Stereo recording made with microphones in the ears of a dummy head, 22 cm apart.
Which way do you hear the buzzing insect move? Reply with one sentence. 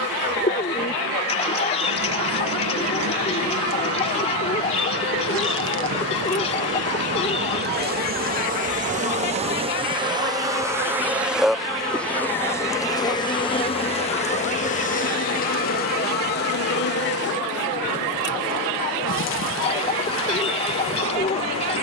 You can hear the buzzing insect move to the left.